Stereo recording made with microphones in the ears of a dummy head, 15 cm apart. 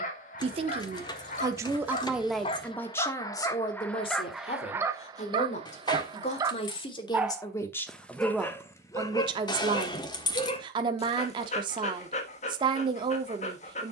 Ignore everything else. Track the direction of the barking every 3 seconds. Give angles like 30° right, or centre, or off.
40° left, 10° right, centre, 30° left, 40° left.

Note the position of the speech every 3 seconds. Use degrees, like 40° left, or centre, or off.
20° right, 30° left, 20° left, 30° right, 30° right.